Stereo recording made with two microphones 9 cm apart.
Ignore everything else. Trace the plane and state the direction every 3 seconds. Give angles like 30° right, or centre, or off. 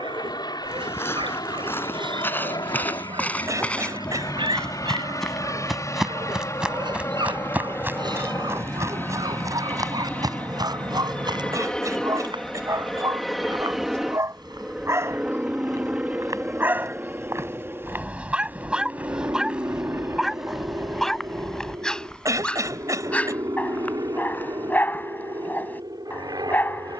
50° left, 40° left, 30° left, 20° left, centre, 20° right, 30° right, 40° right, 40° right.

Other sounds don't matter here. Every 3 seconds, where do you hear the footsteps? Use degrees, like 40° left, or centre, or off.
20° left, 10° left, 20° right, 50° right, 60° right, 40° right, 10° right, 10° left, 20° left.